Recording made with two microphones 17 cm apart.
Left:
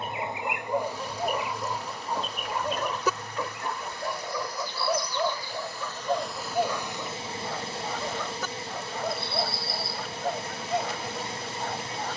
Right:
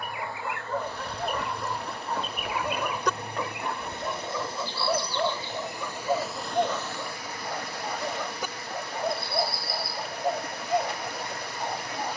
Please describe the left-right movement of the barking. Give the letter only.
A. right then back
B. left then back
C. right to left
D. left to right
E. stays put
D.